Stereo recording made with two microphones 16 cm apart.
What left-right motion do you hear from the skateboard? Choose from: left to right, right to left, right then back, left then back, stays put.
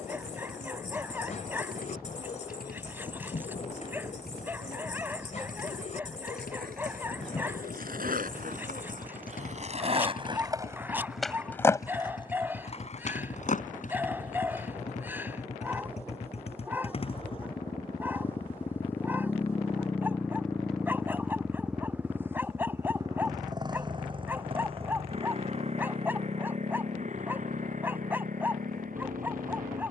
right to left.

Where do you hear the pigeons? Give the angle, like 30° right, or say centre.
50° left.